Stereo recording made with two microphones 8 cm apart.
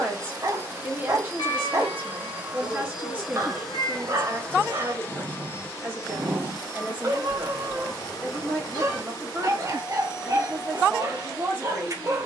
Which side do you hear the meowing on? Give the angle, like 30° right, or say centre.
60° left.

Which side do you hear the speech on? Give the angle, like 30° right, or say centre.
20° right.